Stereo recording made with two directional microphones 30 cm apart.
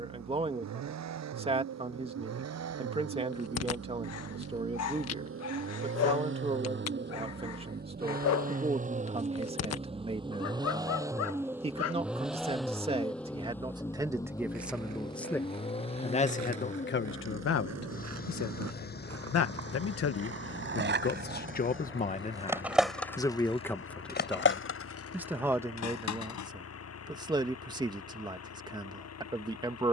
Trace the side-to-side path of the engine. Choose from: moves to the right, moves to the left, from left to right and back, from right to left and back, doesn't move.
moves to the left.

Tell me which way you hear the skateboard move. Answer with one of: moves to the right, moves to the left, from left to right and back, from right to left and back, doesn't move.
moves to the left.